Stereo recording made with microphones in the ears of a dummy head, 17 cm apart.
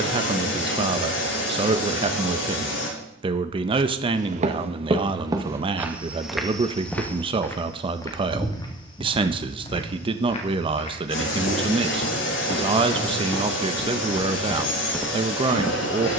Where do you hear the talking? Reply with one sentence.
In this clip you hear the talking on the right.